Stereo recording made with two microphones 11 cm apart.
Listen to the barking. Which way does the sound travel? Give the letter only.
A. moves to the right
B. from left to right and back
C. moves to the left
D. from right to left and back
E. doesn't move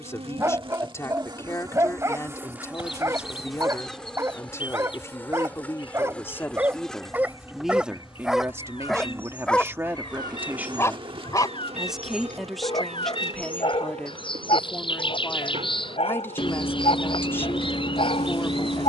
C.